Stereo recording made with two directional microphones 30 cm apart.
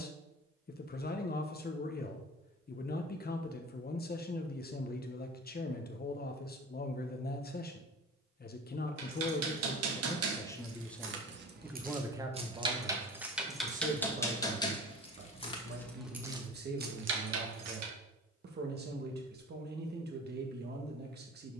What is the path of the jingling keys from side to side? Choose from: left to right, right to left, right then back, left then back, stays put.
left then back.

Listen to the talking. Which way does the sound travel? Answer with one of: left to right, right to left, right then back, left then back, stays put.
left to right.